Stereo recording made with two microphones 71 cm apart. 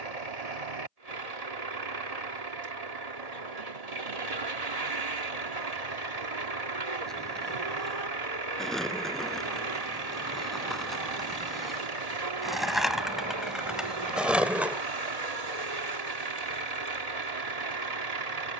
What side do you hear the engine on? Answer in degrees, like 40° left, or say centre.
60° right.